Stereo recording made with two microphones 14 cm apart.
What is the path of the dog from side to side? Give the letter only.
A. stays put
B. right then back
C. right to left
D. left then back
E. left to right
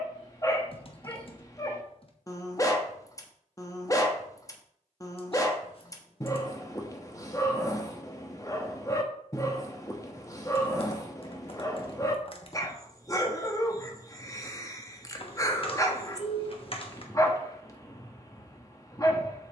A.